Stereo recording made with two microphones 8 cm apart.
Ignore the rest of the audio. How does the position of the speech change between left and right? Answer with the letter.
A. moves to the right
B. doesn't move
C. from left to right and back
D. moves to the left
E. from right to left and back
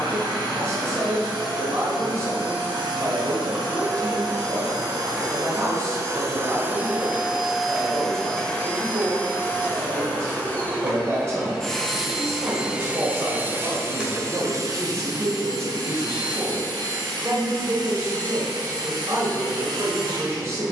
B.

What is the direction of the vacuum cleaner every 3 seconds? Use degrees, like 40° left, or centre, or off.
70° right, 60° right, 10° right, 20° left, 30° right, 60° right, 60° right.